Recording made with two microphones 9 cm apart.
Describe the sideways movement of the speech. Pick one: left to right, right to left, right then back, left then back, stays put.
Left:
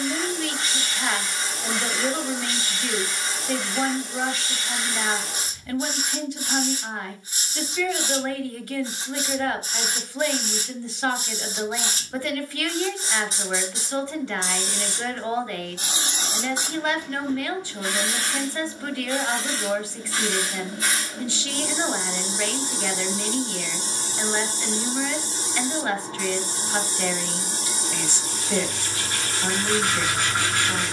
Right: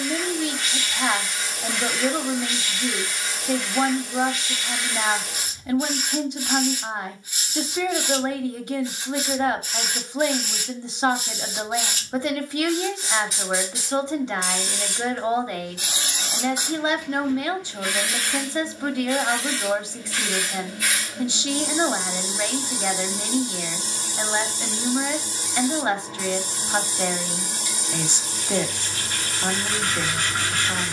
stays put.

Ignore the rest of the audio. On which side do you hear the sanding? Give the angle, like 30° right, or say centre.
30° left.